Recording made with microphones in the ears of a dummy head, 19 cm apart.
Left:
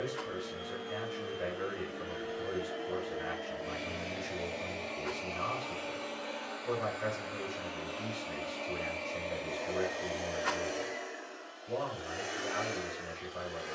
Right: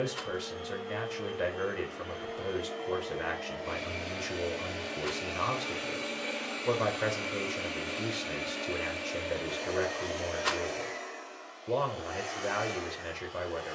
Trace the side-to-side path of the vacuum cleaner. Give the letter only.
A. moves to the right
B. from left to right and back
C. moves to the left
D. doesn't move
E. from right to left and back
B.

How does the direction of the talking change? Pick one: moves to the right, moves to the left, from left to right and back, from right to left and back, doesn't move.
doesn't move.